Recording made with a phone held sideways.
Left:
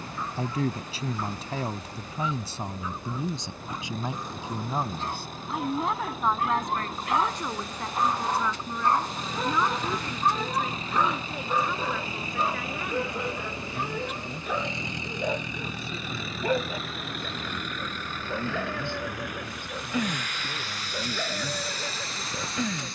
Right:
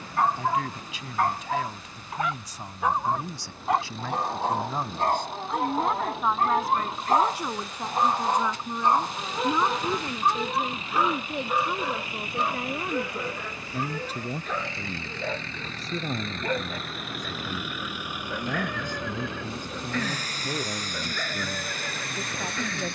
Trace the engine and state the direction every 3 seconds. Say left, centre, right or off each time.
left, left, left, left, left, centre, right, right.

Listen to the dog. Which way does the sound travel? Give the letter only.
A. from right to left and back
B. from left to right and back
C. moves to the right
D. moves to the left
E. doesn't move
D.